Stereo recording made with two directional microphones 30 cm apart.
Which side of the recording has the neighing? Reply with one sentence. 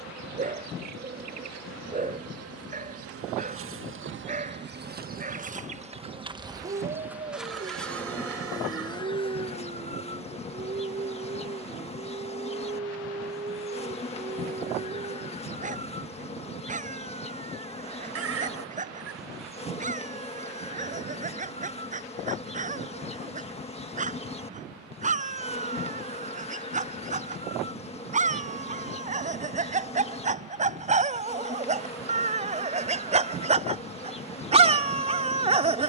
You can hear the neighing on the right.